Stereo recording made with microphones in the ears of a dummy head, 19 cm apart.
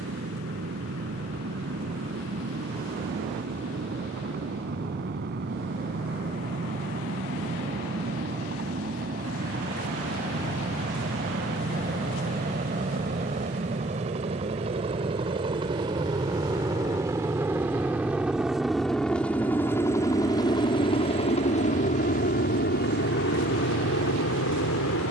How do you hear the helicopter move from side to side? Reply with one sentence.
In this clip you hear the helicopter go from the right side to the left.